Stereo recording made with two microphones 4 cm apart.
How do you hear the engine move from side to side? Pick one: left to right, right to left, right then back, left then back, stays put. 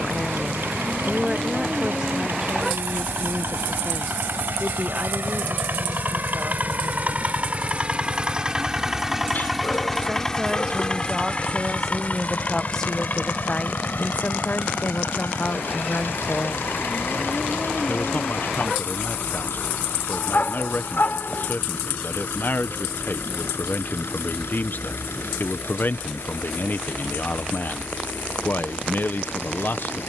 right to left.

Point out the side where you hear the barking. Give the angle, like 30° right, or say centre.
50° left.